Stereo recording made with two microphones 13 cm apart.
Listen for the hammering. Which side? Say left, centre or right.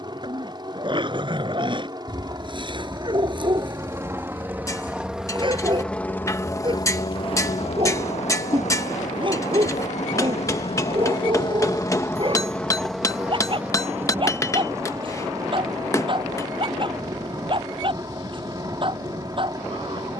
left.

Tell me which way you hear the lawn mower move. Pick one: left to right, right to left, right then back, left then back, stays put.
left then back.